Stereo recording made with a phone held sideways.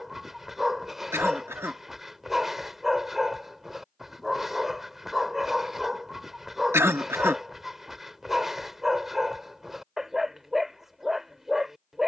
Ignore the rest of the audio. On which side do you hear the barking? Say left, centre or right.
centre.